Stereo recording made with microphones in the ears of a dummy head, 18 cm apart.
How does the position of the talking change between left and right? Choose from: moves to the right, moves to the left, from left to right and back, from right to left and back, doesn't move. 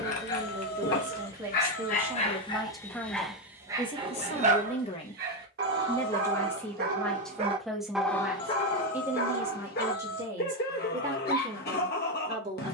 from right to left and back.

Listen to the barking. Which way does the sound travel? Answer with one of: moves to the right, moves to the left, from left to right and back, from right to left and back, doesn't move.
from left to right and back.